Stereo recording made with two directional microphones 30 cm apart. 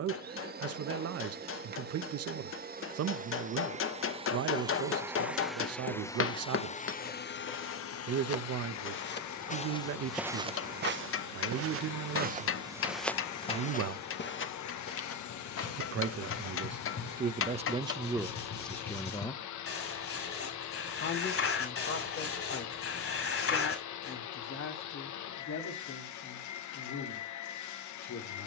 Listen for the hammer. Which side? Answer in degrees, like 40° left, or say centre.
40° left.